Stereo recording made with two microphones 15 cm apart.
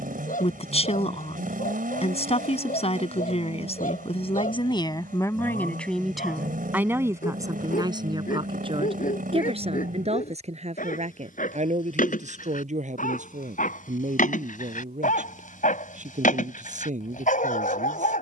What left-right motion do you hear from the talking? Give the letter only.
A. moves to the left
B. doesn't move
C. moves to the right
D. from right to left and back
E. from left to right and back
C.